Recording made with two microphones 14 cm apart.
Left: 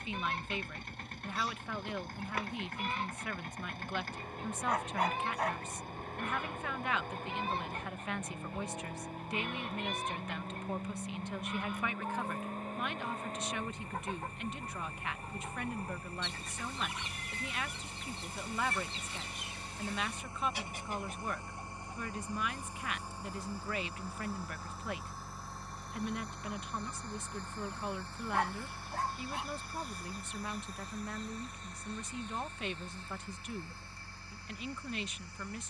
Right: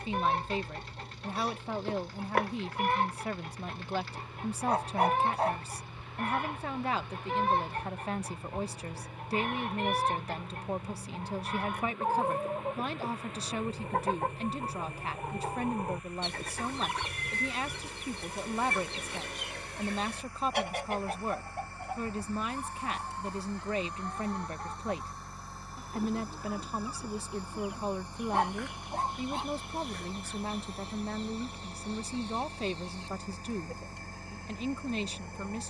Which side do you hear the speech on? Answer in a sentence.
In this clip you hear the speech on the right.